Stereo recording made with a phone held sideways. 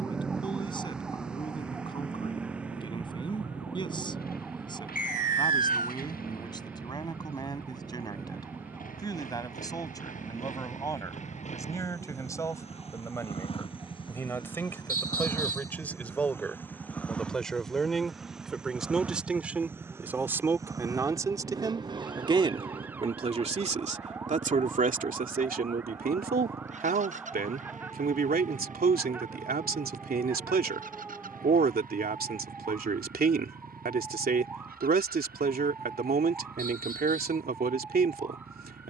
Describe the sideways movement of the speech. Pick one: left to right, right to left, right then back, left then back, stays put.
left to right.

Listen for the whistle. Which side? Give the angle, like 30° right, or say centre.
60° left.